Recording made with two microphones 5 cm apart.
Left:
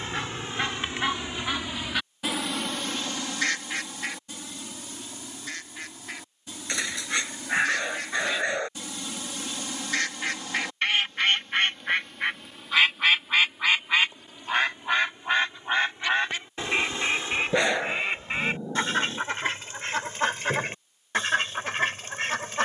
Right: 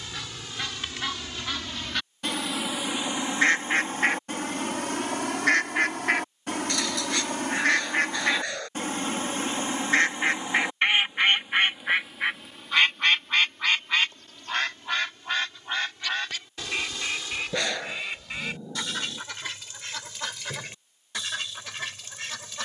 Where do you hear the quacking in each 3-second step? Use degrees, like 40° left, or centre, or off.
10° left, 60° right, 60° right, 30° right, 10° left, 30° left, 40° left, 40° left.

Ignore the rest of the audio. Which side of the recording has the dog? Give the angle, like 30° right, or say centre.
20° left.